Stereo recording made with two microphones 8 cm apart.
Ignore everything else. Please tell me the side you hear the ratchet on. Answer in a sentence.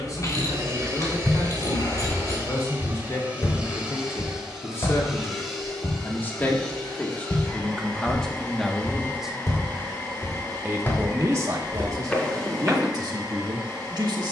In this clip you hear the ratchet on the left.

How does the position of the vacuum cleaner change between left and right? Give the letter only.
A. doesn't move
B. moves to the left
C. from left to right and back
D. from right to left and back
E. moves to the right
B.